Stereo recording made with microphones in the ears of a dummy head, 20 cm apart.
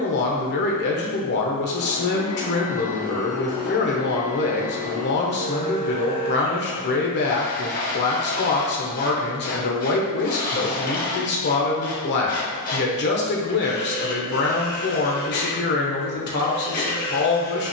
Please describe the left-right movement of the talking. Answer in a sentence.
In this clip you hear the talking stay put.